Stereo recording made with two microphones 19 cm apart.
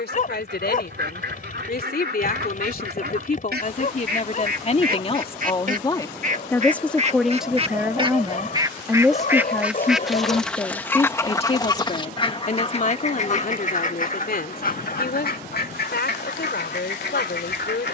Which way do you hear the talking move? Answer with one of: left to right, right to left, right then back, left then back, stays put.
right then back.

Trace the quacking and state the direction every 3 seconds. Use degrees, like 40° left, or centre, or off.
60° right, 50° right, 30° right, 10° left, 40° left, 60° left.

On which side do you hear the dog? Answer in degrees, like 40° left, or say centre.
40° left.